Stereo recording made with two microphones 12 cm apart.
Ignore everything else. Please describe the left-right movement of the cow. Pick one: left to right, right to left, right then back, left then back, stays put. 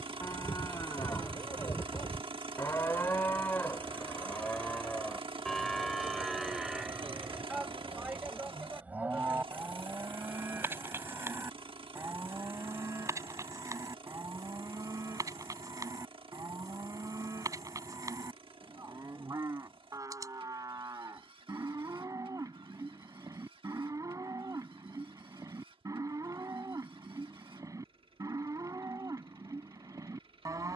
left to right.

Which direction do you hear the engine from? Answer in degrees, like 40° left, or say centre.
50° right.